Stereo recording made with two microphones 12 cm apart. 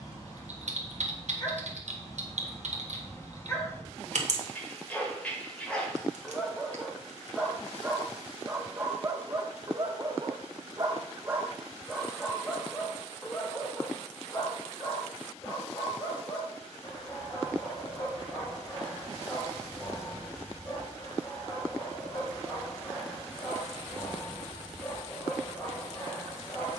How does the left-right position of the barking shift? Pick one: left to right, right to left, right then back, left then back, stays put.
right then back.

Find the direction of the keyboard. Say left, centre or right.
right.